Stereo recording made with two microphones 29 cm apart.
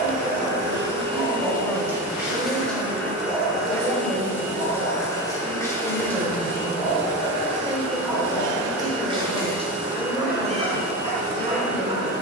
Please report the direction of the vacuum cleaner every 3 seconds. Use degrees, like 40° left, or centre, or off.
20° right, 10° left, 20° left, 10° right.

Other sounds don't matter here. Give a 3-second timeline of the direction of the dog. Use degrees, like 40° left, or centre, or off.
10° right, 10° left, centre, 20° right.